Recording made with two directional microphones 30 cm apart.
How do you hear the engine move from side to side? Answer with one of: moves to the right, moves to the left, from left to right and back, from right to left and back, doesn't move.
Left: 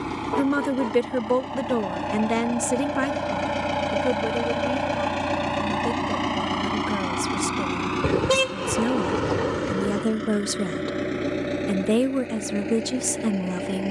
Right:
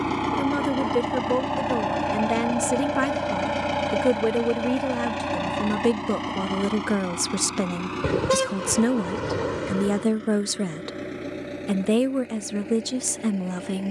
moves to the left.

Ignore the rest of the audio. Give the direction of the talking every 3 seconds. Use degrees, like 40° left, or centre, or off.
10° left, 40° right, 40° right, 10° right, 10° left.